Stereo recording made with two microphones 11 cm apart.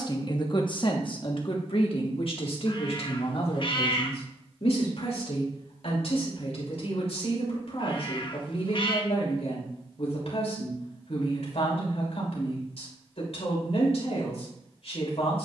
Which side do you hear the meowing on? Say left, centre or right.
left.